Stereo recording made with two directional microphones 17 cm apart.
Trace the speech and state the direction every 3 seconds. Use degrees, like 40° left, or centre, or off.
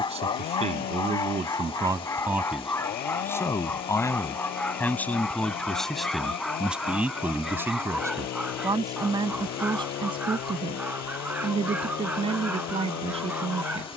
30° right, 10° left, 10° right, 30° right, 30° right.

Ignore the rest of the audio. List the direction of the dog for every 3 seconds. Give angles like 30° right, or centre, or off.
20° left, 10° left, centre, 10° right, 10° right.